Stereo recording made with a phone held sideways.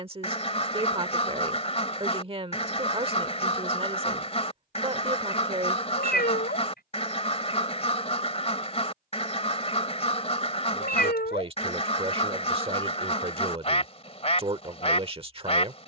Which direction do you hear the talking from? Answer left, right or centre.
right.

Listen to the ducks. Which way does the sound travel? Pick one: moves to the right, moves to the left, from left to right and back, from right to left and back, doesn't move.
doesn't move.